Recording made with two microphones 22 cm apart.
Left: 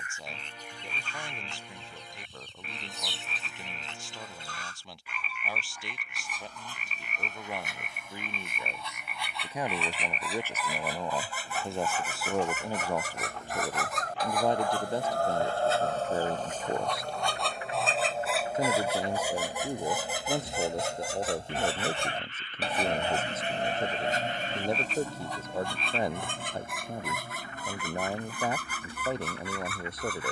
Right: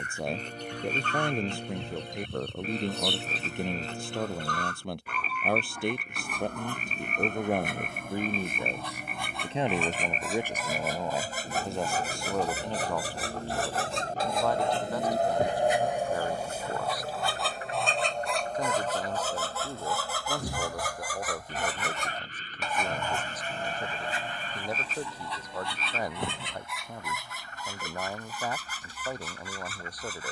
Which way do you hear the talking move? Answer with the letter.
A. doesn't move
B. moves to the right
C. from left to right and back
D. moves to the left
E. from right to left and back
D.